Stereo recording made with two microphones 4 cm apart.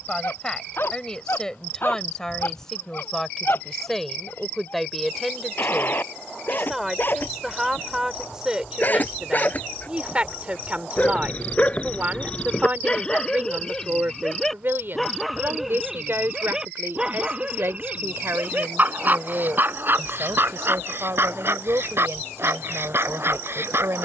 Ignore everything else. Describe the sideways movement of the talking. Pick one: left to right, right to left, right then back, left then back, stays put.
left to right.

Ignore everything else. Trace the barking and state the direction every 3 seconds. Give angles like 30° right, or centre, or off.
50° left, 50° left, 40° left, 30° left, 20° left, 10° right, 50° right, 60° right.